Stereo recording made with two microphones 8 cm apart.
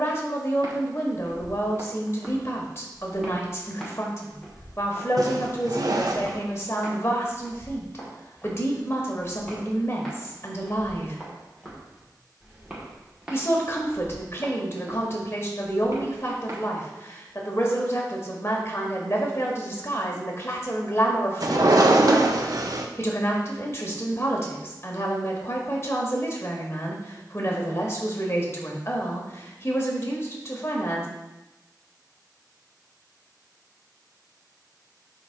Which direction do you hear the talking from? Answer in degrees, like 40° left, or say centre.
40° left.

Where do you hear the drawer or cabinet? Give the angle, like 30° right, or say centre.
60° right.